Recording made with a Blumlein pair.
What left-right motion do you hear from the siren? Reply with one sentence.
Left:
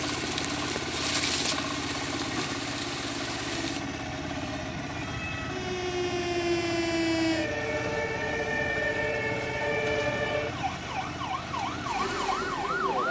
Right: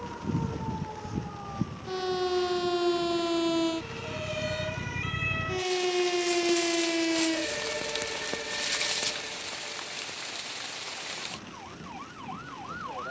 In this clip you hear the siren move from right to left.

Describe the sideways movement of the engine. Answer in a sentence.
You can hear the engine stay in one place.